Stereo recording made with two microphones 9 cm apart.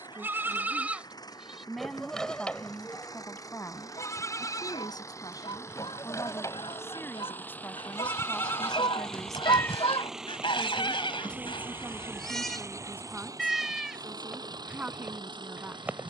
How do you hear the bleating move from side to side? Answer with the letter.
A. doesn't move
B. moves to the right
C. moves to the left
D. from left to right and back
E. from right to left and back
E.